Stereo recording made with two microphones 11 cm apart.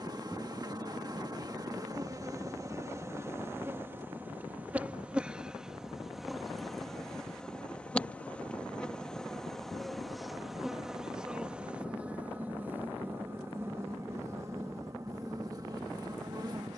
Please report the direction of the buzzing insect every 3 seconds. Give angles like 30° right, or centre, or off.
30° right, 10° right, 10° left, centre, 20° right, 30° right.